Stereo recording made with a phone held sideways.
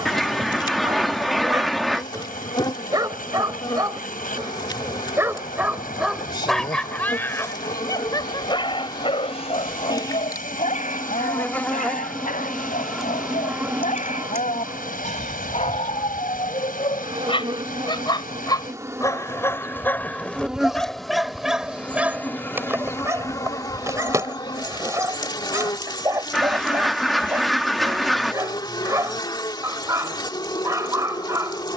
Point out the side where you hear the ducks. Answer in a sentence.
You can hear the ducks in the centre.